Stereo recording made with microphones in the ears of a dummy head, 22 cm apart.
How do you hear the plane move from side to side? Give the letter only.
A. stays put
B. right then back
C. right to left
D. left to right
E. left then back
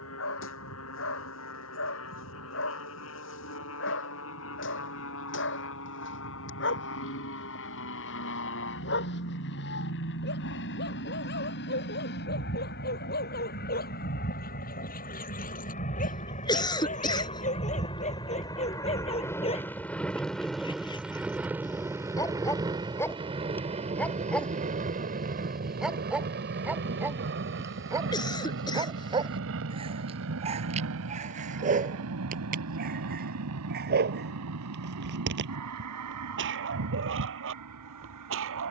D.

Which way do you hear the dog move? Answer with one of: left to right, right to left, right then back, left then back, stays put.
left to right.